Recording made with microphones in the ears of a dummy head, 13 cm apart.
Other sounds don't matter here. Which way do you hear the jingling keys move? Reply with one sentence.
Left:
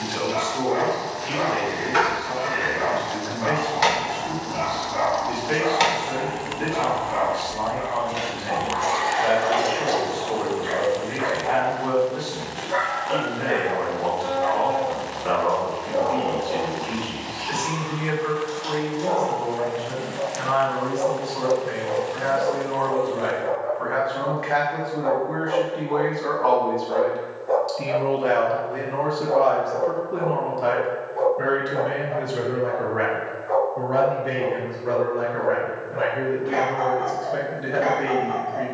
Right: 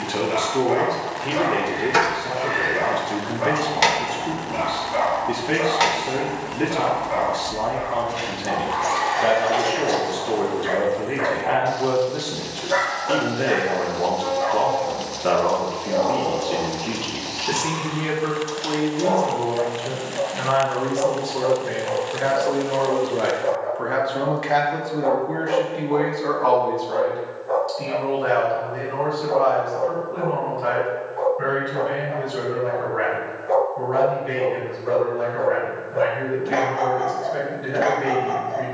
In this clip you hear the jingling keys move from right to left.